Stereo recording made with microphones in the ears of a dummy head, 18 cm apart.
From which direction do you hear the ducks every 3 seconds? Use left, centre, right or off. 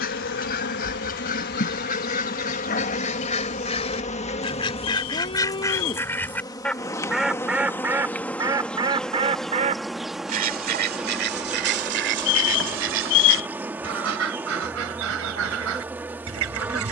left, left, centre, right, right, right.